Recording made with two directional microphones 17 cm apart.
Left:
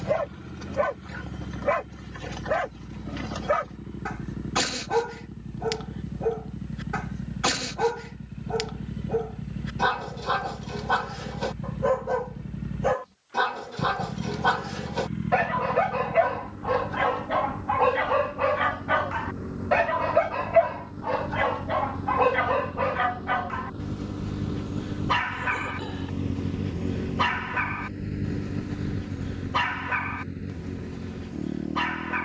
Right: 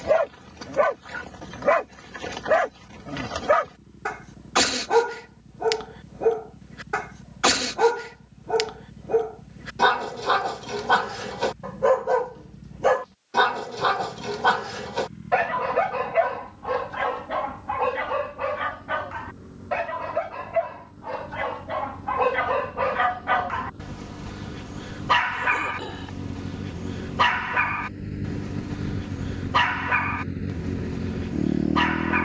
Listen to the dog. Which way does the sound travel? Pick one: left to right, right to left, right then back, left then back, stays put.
left then back.